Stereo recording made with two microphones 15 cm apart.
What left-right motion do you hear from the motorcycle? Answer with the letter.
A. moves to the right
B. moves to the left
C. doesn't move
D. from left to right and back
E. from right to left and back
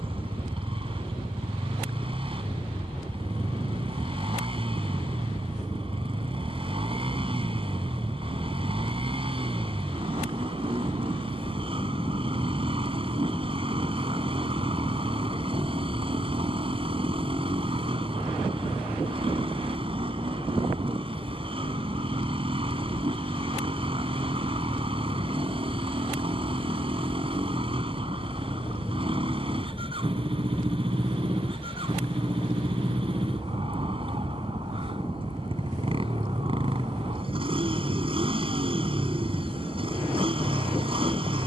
C.